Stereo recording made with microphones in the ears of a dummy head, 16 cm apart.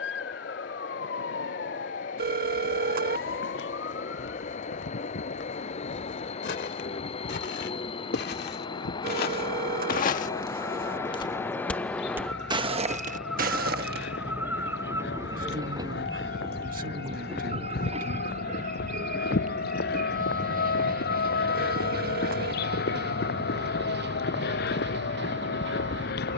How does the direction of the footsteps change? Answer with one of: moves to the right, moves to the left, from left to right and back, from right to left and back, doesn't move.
moves to the right.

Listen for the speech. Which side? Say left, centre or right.
right.